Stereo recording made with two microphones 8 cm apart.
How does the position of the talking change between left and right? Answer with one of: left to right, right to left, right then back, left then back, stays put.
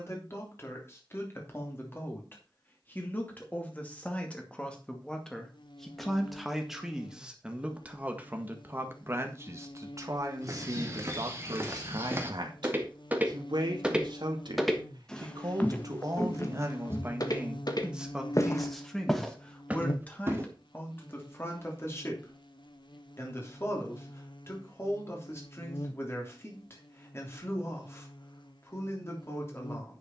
right then back.